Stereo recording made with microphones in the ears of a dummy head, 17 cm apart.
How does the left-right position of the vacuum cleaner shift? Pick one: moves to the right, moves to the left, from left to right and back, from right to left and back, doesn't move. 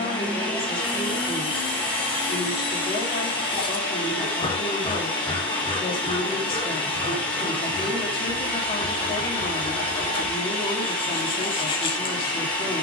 doesn't move.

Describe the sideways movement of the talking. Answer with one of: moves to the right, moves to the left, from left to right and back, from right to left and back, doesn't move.
doesn't move.